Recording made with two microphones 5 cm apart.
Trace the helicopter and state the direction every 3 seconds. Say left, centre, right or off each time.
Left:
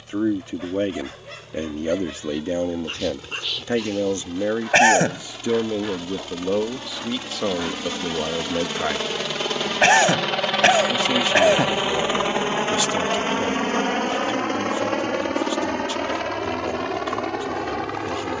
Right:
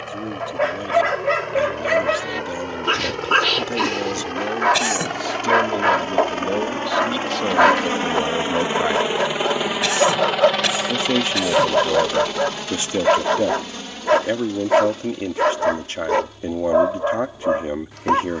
right, right, right, centre, left, left.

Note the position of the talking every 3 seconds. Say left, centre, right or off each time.
left, left, centre, right, right, right.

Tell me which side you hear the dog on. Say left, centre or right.
right.